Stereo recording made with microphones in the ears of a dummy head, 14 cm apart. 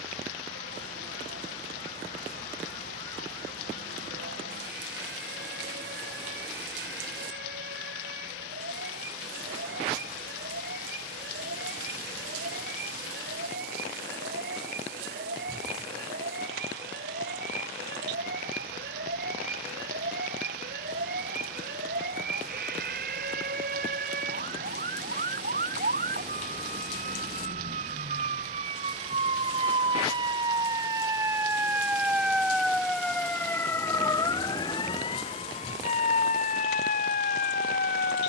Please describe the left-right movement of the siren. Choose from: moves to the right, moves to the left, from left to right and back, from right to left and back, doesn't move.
moves to the left.